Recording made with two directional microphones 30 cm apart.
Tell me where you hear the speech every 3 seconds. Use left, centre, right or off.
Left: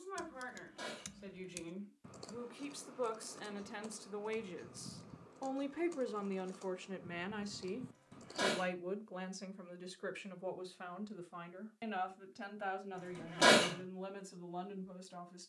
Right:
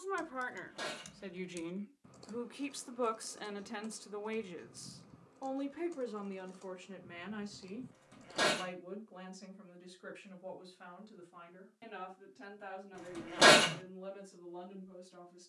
right, centre, left, left, left.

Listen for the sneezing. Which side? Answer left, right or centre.
right.